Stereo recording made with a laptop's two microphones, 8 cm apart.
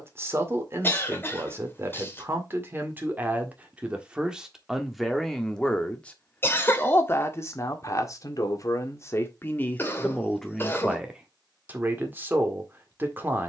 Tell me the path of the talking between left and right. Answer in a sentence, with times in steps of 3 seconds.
You can hear the talking on the right from 0 s, in the centre from 3 s, on the left from 6 s, in the centre from 9 s and on the right from 12 s.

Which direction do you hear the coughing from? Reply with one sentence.
You can hear the coughing on the left.